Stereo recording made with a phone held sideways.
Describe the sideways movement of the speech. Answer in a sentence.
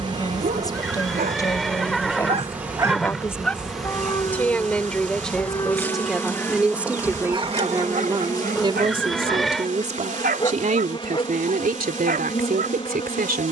You can hear the speech go from the left side to the right.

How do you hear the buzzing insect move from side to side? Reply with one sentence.
In this clip you hear the buzzing insect move to the left.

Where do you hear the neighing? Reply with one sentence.
In this clip you hear the neighing in the centre.